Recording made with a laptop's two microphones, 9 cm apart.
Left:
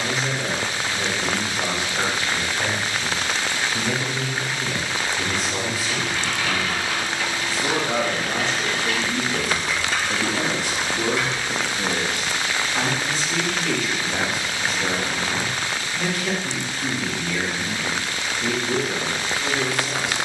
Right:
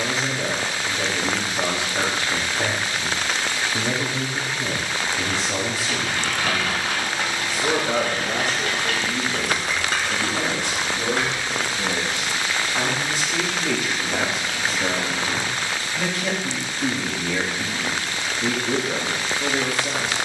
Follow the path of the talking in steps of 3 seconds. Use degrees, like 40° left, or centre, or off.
40° right, 40° right, 20° right, 10° left, 20° right, 30° right, 30° right.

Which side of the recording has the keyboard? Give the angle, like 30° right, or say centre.
50° right.